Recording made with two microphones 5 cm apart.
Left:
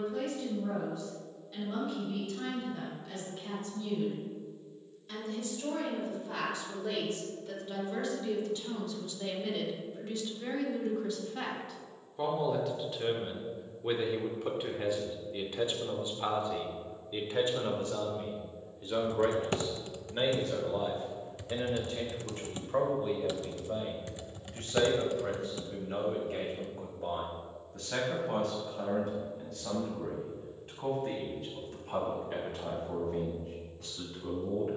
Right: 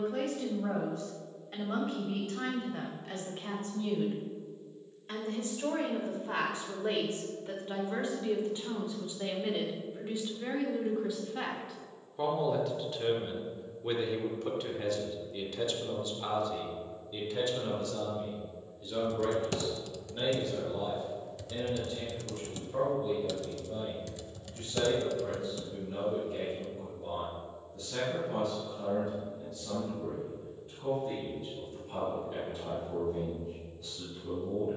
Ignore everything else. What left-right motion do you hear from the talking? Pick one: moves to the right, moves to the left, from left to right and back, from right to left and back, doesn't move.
moves to the left.